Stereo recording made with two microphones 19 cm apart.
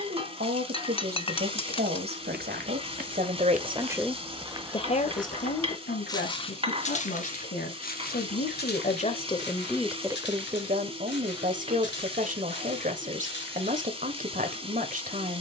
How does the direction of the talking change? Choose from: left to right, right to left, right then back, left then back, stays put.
left then back.